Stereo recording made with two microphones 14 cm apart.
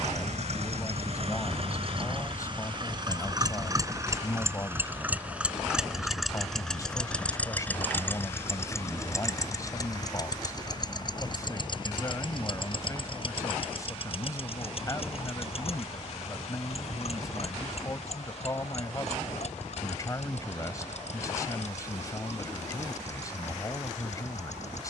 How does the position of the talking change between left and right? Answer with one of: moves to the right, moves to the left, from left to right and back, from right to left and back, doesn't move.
doesn't move.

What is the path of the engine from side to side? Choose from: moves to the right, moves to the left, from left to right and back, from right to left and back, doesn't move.
moves to the left.